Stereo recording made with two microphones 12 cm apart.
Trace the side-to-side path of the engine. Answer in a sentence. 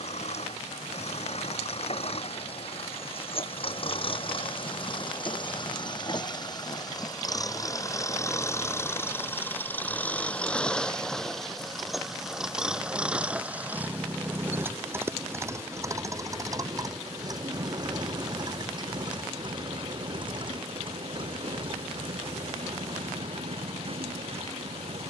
In this clip you hear the engine move to the right.